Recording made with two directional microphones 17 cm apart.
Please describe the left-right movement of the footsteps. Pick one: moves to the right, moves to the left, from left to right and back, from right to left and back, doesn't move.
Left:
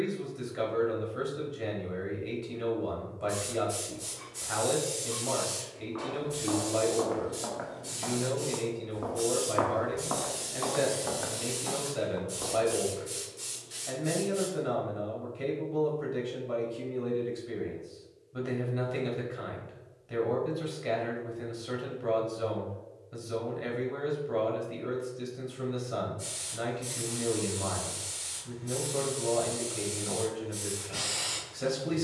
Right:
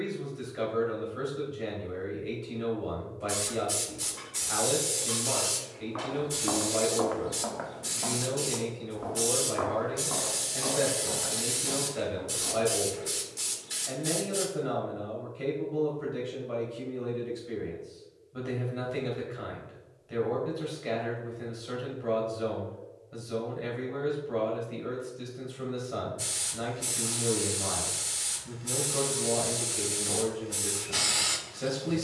moves to the left.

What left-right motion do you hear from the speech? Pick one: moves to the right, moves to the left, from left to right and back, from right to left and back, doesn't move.
doesn't move.